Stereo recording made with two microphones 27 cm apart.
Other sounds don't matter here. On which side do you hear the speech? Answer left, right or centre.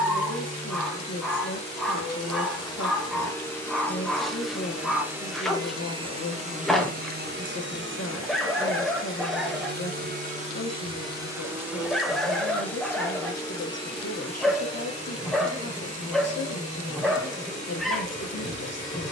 left.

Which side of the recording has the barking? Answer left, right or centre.
centre.